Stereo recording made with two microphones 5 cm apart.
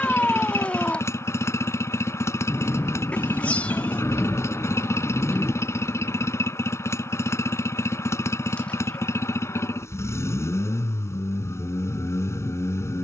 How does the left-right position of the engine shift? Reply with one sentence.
You can hear the engine stay in one place.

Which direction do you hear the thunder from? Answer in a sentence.
You can hear the thunder on the left.